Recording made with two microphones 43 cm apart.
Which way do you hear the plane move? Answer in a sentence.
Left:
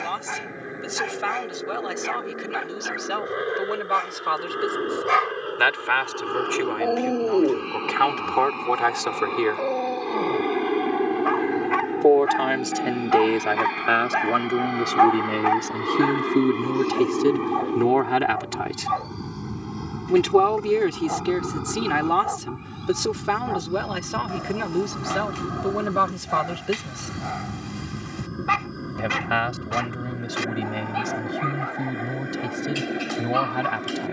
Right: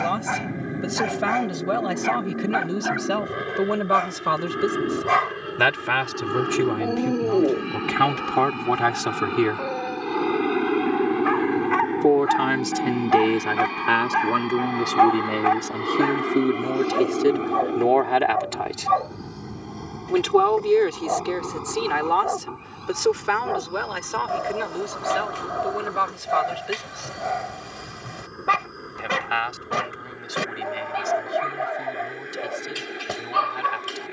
In this clip you hear the plane move to the left.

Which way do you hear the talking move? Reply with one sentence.
You can hear the talking go from the right side to the left.